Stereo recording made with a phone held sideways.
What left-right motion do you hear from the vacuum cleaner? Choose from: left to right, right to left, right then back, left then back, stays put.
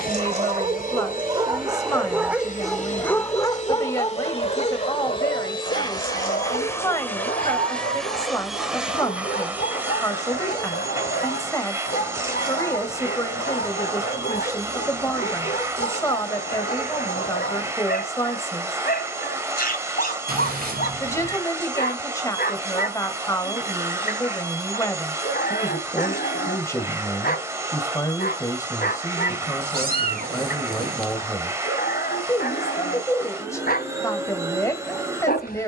left to right.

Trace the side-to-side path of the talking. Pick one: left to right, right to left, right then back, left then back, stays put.
stays put.